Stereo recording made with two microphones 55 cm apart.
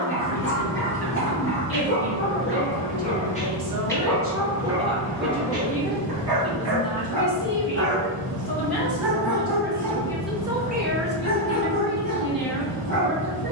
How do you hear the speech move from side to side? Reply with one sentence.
You can hear the speech move from right to left and back again.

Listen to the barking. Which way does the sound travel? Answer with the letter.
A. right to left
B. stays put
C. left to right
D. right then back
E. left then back
D.